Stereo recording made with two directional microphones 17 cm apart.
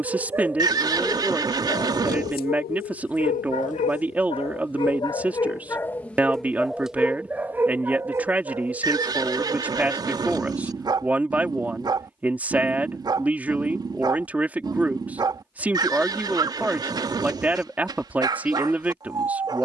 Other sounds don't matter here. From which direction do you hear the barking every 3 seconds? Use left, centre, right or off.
left, left, centre, right, right, right, right.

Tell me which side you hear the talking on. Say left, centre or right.
centre.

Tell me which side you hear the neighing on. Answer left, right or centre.
right.